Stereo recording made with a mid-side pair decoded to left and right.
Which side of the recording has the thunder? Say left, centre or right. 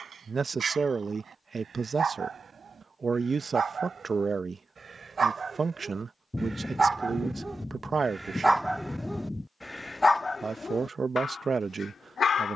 centre.